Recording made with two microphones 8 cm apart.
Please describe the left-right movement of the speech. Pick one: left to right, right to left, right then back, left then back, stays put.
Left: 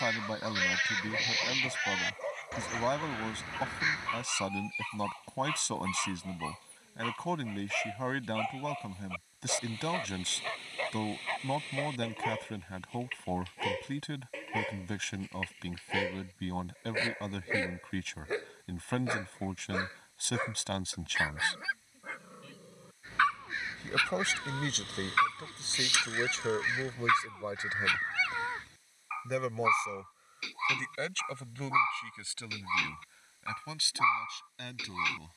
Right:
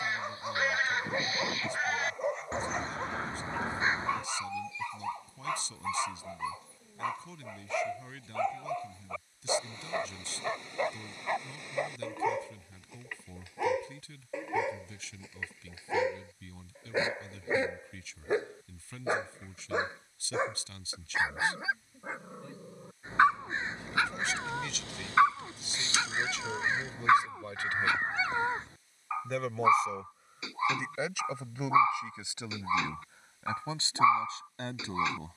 left to right.